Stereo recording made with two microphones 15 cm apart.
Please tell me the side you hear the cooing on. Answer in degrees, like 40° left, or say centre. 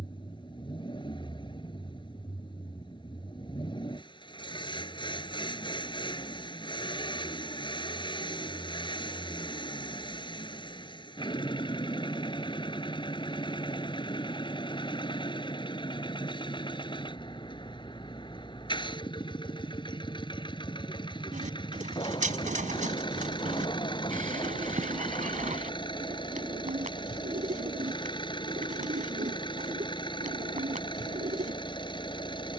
60° right.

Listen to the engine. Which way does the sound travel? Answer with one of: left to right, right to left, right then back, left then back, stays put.
stays put.